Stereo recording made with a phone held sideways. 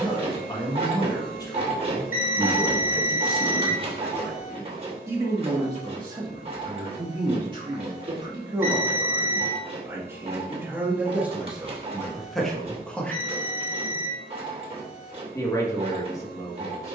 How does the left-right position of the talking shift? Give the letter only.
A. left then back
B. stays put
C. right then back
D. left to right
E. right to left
C.